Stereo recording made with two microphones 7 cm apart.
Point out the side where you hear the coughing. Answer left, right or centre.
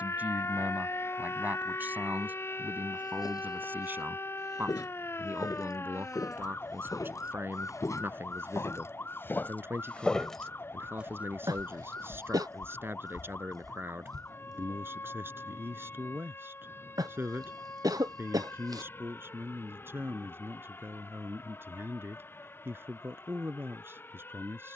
right.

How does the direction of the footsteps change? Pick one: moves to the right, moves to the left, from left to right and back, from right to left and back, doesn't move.
moves to the right.